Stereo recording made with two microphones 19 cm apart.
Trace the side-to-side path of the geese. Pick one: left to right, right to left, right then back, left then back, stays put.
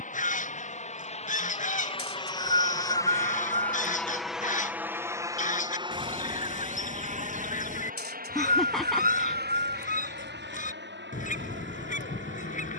stays put.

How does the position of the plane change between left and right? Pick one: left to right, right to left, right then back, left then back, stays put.
left to right.